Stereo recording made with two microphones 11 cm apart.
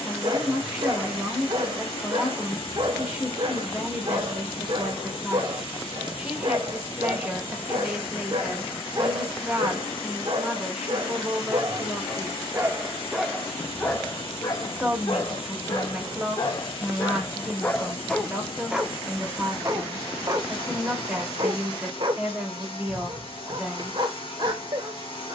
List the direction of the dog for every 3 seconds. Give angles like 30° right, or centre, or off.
50° right, 50° right, 50° right, 50° right, 10° left, 40° left, 20° right, 50° right, 50° right.